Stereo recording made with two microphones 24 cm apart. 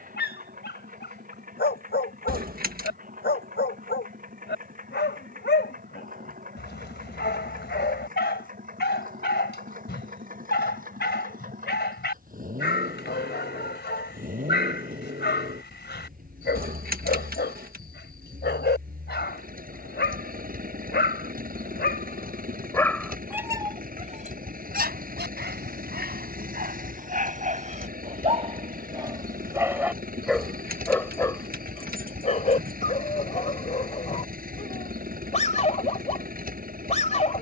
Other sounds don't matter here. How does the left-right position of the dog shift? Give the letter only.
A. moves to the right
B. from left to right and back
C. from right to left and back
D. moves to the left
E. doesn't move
B.